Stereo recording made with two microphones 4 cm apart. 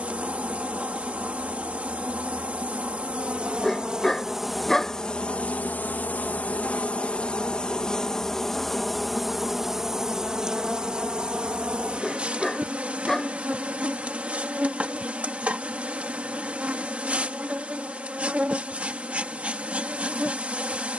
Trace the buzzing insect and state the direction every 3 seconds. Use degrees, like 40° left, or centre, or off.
40° right, centre, 20° left, 20° right, 30° right, 30° right, 30° right.